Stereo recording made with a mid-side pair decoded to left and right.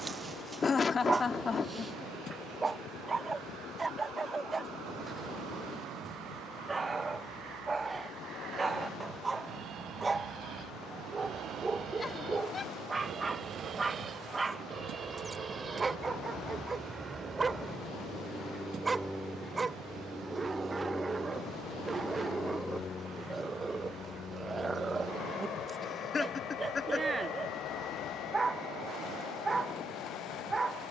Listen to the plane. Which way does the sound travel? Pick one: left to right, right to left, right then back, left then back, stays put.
right to left.